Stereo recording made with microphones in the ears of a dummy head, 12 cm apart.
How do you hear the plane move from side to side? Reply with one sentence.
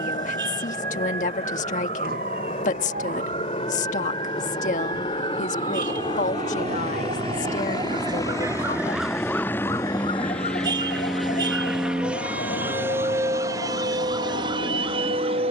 In this clip you hear the plane move from left to right.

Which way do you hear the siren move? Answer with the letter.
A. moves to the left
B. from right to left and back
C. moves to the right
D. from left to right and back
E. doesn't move
A.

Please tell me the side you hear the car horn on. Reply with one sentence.
You can hear the car horn on the right.